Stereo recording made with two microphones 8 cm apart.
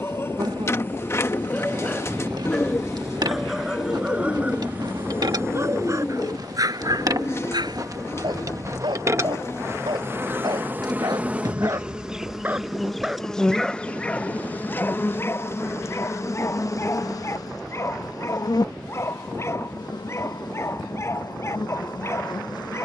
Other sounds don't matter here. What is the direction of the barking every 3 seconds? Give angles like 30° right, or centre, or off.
20° left, 20° right, 60° right, 60° right, centre, 30° left, 30° left, 30° left.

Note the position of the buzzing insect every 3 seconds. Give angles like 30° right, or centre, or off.
60° right, 60° right, 50° right, 30° right, 10° left, 40° left, 60° left, 60° left.